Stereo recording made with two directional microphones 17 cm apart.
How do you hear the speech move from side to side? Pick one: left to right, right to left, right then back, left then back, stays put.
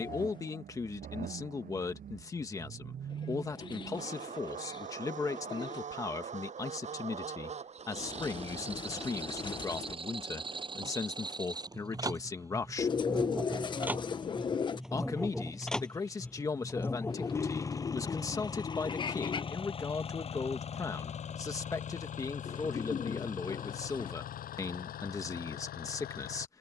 stays put.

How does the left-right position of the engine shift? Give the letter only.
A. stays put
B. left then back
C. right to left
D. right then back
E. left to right
C.